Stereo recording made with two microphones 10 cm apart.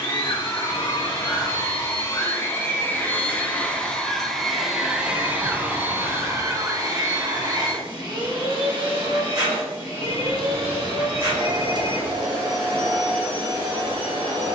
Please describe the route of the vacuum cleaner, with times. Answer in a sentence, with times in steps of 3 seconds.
In this clip you hear the vacuum cleaner on the left from 0 s, in the centre from 3 s and on the right from 6 s.